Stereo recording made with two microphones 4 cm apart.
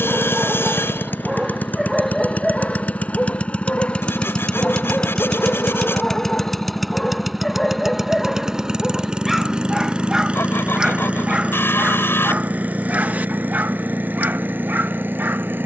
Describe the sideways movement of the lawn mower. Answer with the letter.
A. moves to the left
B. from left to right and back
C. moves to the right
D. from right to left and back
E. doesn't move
C.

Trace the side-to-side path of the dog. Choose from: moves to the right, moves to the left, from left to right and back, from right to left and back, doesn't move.
from right to left and back.